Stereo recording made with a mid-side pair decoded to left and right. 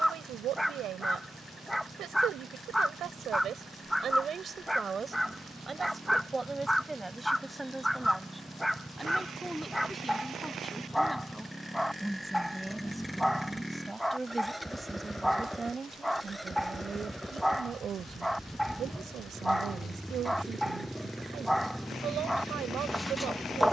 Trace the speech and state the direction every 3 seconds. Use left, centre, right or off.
right, right, centre, centre, centre, right, right, right.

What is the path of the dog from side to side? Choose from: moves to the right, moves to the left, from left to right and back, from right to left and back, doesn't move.
doesn't move.